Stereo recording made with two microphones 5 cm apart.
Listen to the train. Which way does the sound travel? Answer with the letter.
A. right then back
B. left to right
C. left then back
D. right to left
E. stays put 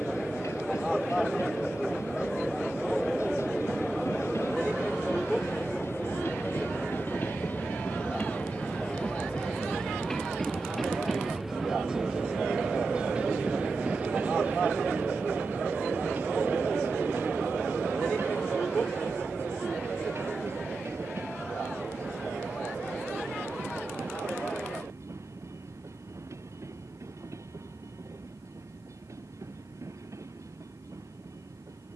B.